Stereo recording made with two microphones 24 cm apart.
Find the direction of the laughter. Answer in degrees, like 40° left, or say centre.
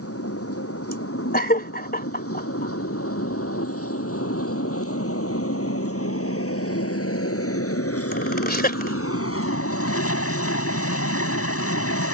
40° left.